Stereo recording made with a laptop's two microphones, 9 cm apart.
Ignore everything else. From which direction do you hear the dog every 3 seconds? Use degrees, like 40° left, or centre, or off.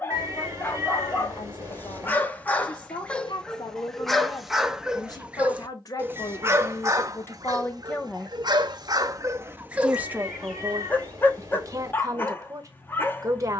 20° left, centre, 40° right, 10° right, 20° left.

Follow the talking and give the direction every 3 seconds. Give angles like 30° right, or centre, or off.
60° left, 50° left, 30° left, 30° right, 40° right.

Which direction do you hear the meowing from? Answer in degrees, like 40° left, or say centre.
30° right.